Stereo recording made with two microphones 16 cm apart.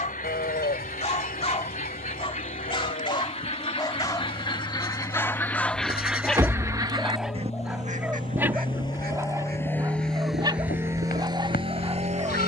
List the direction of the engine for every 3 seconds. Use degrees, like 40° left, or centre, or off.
60° left, 50° left, 40° left, 10° right.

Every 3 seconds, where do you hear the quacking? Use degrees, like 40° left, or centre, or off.
50° left, 30° left, 40° right, 70° right.